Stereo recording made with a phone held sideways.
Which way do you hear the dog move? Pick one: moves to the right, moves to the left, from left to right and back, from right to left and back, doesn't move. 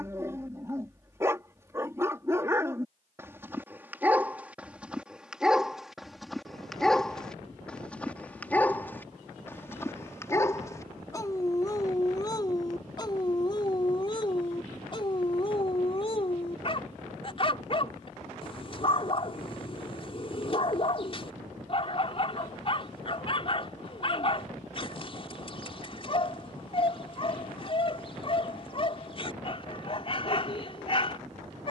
moves to the left.